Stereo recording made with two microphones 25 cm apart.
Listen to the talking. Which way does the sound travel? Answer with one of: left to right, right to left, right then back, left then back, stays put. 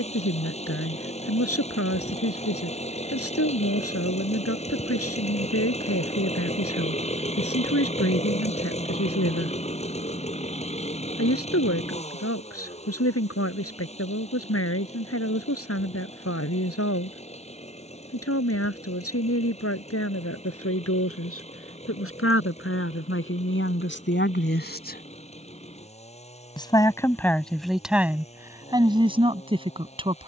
left to right.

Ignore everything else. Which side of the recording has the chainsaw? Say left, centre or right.
left.